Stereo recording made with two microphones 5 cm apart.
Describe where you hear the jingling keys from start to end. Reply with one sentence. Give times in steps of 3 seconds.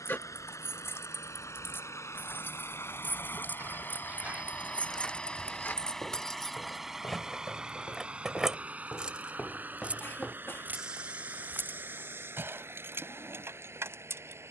In this clip you hear the jingling keys on the left from 0 s, in the centre from 6 s and on the right from 9 s.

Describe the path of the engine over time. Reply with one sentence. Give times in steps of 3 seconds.
You can hear the engine on the left from 0 s, in the centre from 6 s and on the right from 9 s.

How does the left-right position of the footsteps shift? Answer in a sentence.
You can hear the footsteps move from right to left and back again.